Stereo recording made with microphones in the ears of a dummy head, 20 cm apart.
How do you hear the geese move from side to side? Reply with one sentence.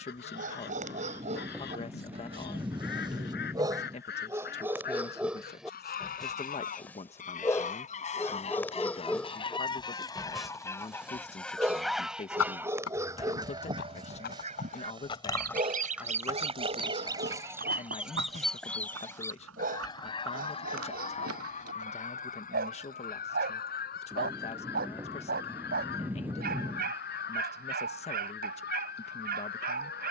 You can hear the geese move from left to right and back again.